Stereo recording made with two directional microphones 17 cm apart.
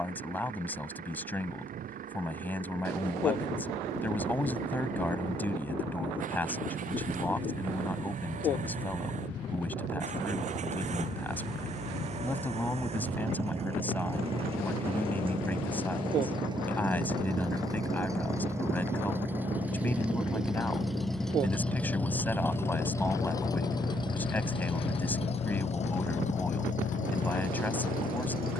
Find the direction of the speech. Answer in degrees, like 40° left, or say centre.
10° left.